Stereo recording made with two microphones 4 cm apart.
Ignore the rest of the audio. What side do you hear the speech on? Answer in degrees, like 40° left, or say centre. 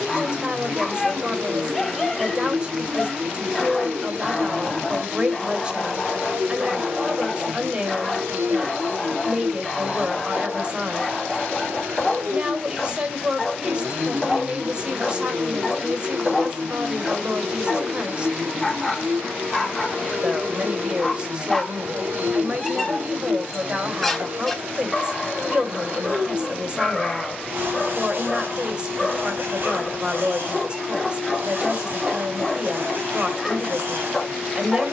30° right.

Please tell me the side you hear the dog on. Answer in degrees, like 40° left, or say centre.
centre.